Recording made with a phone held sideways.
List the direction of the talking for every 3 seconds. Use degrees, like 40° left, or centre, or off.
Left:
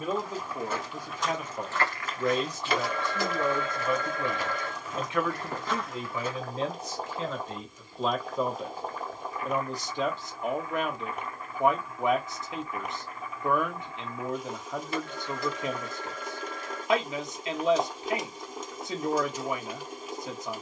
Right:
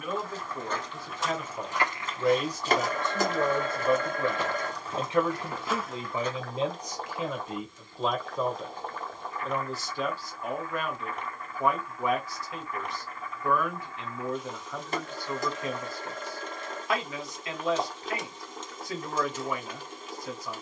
10° left, 30° right, 10° right, 20° left, 20° left, 20° left, 20° left.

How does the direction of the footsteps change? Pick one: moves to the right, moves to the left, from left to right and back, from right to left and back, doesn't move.
from left to right and back.